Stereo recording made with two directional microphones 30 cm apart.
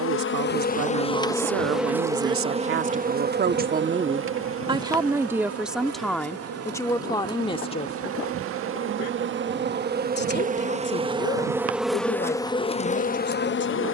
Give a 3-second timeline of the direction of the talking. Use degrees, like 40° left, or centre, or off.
50° right, 20° right, 10° left, 40° left, 40° left.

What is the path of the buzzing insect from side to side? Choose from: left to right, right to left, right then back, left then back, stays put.
right then back.